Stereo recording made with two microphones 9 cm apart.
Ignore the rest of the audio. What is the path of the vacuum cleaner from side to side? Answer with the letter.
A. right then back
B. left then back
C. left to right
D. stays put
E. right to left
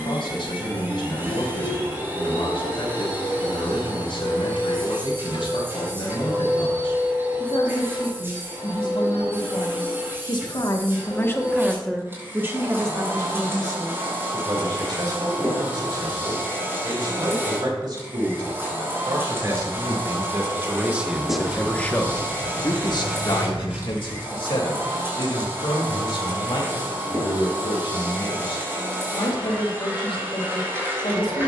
D.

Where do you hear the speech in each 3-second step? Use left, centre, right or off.
left, left, left, left, right, right, right, left, left, left, left.